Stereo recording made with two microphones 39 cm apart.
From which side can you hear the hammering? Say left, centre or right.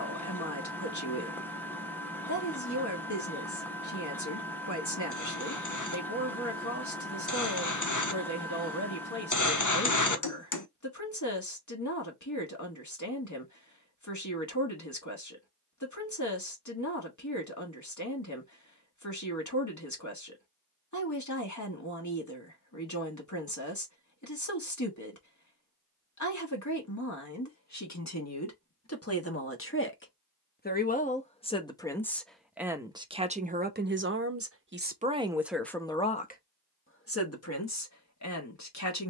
left.